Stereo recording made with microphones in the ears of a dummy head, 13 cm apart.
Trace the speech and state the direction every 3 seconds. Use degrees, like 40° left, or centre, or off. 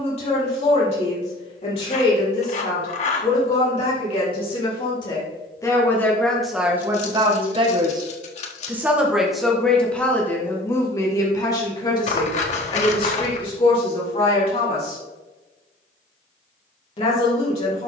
50° left, 40° left, 20° right, 10° left, 40° left, 40° left.